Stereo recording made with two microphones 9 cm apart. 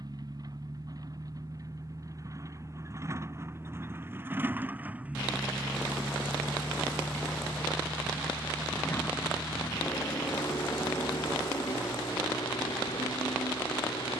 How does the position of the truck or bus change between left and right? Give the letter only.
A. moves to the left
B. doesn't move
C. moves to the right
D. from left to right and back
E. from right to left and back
A.